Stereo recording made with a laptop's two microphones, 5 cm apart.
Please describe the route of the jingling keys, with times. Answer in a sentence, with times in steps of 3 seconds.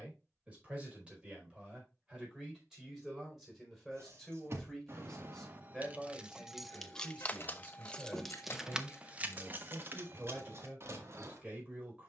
You can hear the jingling keys not at all from 0 s, on the right from 3 s, in the centre from 6 s and on the right from 9 s.